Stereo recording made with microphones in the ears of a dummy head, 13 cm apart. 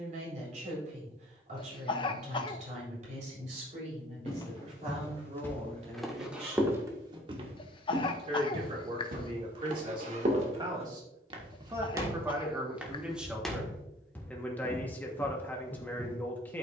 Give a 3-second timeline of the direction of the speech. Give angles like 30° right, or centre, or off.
50° right, 50° right, 40° right, 30° right, centre, 10° left.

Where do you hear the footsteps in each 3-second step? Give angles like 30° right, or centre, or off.
off, 20° left, 30° right, 50° right, centre, 30° left.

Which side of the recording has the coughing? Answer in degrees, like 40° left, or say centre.
30° left.